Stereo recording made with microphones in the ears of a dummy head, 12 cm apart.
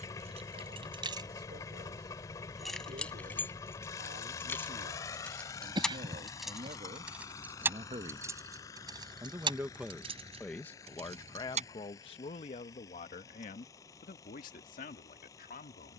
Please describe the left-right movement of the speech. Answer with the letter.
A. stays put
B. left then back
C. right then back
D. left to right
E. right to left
E.